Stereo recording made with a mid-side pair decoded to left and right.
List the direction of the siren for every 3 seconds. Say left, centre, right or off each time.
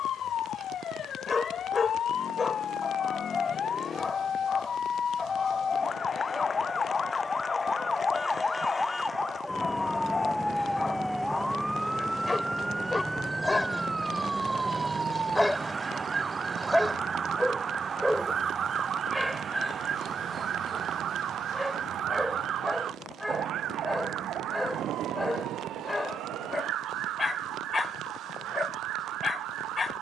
left, left, left, centre, centre, right, right, right, right, right.